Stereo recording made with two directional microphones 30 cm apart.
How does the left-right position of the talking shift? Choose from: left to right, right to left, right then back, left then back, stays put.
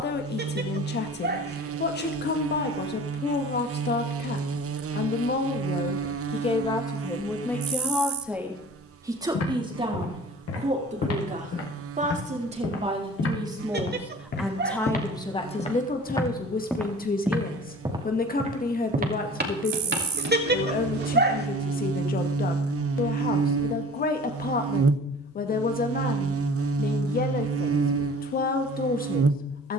right then back.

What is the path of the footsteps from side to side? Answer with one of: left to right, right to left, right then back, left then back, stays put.
left to right.